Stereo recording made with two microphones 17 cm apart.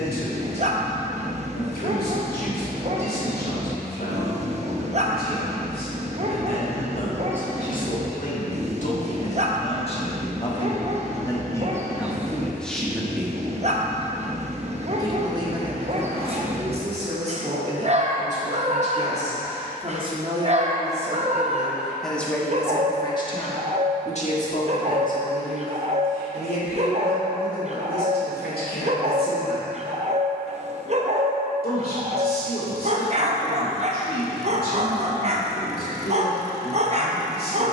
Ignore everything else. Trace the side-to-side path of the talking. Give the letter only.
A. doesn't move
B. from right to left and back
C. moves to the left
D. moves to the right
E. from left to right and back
E.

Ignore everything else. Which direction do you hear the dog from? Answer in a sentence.
In this clip you hear the dog on the right.